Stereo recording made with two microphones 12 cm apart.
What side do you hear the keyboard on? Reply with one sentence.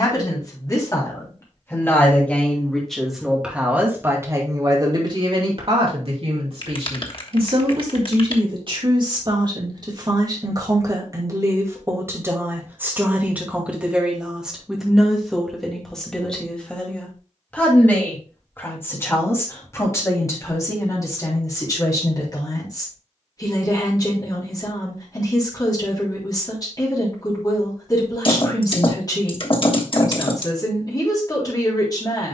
You can hear the keyboard on the left.